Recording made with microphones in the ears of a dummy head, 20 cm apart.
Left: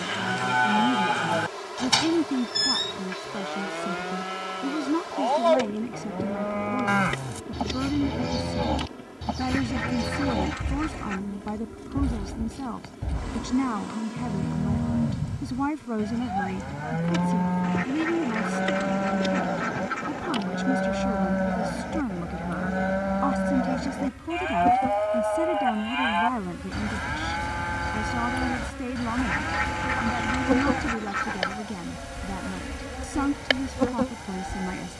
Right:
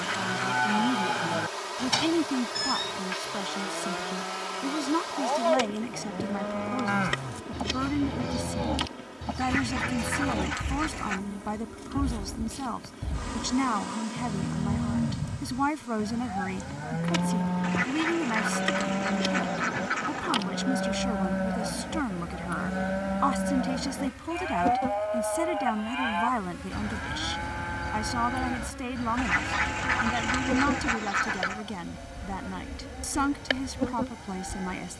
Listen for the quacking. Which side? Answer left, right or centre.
right.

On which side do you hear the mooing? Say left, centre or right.
centre.